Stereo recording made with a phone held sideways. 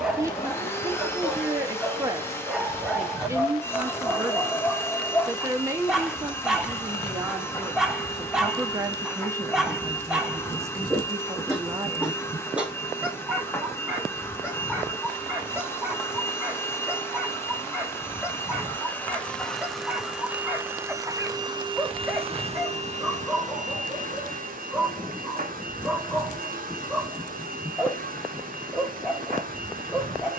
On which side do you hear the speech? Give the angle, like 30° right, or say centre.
20° right.